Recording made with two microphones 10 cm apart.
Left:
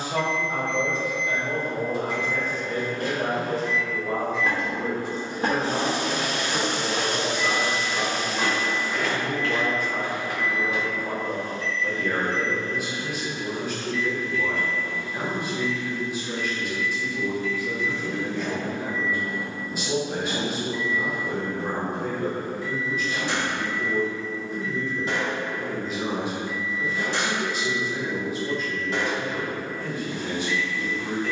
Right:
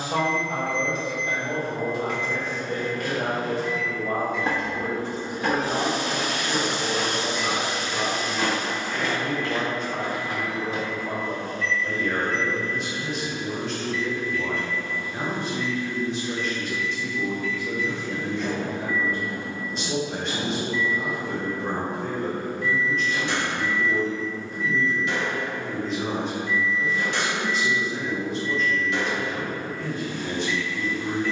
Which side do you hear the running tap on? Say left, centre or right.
centre.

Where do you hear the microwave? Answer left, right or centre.
left.